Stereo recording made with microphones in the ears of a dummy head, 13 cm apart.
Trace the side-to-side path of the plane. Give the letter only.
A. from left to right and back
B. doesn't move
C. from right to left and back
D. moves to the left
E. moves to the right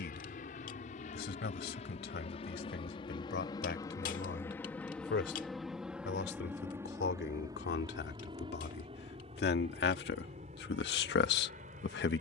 E.